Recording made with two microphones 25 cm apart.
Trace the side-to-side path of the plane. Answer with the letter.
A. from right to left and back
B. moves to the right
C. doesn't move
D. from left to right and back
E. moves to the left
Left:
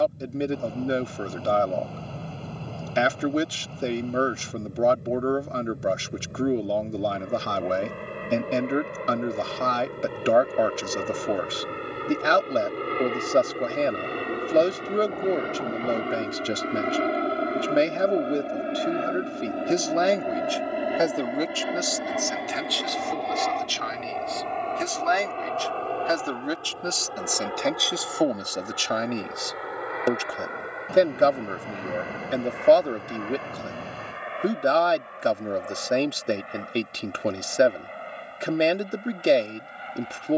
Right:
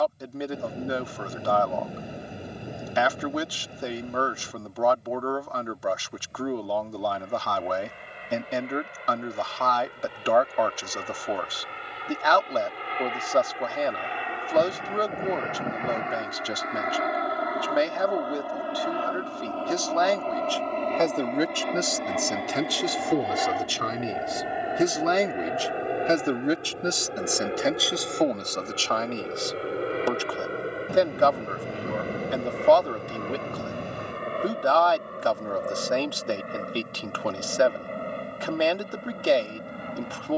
B.